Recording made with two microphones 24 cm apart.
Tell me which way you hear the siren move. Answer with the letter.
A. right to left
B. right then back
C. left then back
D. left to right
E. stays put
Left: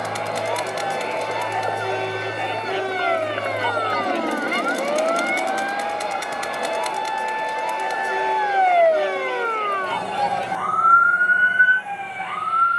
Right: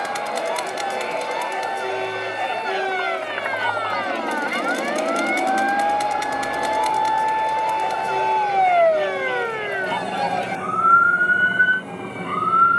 D.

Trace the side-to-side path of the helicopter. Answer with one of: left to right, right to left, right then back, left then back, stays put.
left to right.